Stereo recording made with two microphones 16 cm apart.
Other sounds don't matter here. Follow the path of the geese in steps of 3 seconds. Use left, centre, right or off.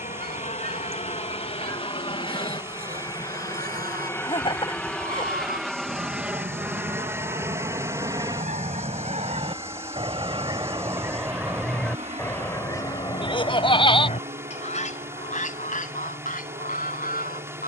right, right, right, right, left, left.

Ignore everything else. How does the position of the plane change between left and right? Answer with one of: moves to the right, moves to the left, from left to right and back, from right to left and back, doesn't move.
moves to the right.